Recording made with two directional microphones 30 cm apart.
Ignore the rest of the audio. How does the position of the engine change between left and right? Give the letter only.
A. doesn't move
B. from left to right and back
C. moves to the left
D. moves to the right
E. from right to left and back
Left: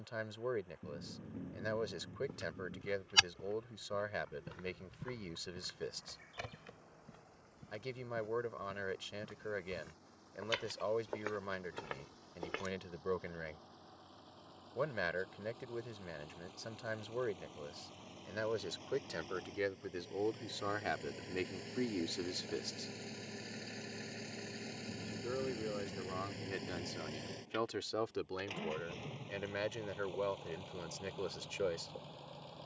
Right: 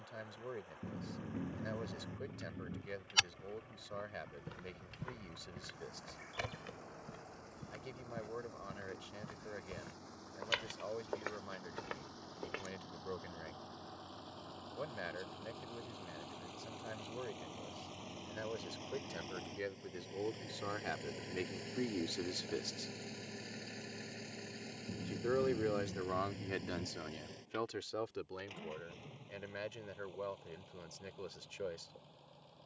C.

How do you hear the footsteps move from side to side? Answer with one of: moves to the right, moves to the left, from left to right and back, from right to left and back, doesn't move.
from left to right and back.